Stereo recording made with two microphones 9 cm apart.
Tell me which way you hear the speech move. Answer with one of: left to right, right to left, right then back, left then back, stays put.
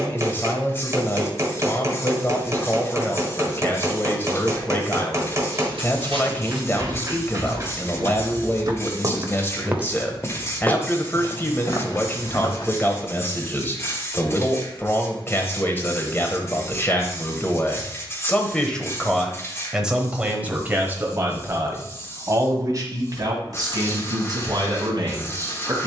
left to right.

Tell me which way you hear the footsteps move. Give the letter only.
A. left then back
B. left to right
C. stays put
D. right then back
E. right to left
E.